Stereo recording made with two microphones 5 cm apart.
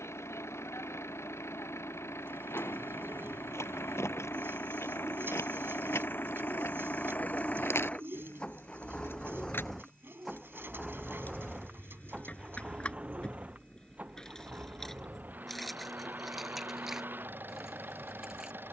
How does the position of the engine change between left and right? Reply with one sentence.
In this clip you hear the engine travel towards the right.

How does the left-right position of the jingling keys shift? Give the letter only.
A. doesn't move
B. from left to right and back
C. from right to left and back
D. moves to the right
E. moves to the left
D.